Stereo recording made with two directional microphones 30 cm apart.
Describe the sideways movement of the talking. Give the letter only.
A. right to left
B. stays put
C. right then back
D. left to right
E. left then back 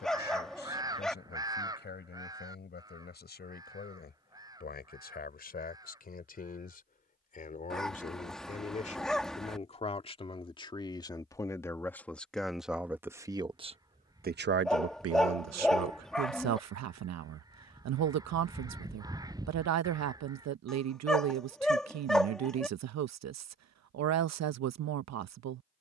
D.